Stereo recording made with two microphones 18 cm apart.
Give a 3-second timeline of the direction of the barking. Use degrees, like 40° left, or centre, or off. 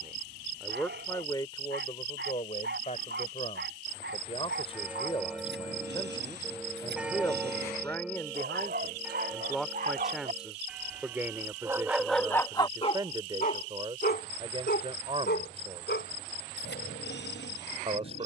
80° right, 80° right, 70° right, 40° right, 40° left, 80° left.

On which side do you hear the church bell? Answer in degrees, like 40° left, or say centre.
10° right.